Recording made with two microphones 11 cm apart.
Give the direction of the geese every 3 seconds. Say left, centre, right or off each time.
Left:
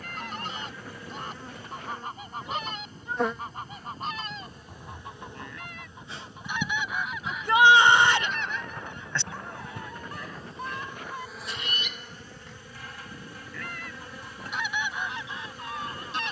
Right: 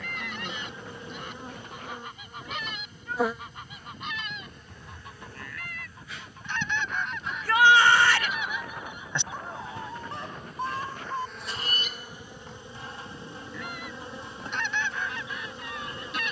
left, left, centre, right, centre, left.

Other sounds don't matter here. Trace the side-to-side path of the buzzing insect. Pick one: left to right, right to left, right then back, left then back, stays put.
left then back.